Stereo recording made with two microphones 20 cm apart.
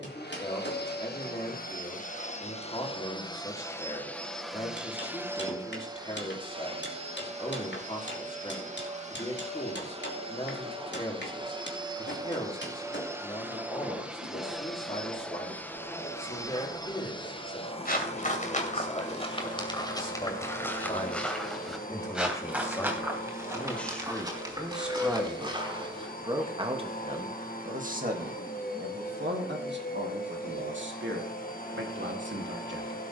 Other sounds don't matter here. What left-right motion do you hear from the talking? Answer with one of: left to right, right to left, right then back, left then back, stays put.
left to right.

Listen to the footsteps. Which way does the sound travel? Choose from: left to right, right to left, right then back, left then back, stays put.
left to right.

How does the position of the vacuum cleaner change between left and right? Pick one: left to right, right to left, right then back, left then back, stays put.
right then back.